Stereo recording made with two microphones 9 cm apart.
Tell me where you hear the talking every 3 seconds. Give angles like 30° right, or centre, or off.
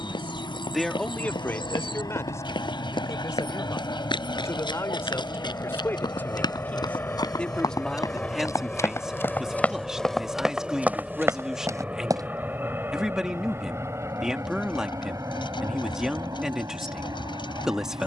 20° left, 30° left, 10° left, 10° right, 10° right, 10° right.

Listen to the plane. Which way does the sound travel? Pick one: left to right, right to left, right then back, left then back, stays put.
left to right.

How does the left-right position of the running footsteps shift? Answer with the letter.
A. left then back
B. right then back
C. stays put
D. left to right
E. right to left
D.